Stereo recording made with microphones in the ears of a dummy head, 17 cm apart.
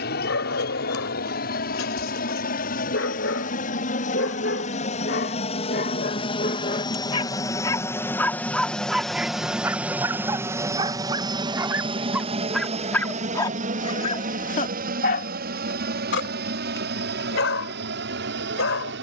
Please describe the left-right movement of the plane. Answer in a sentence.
You can hear the plane go from the left side to the right.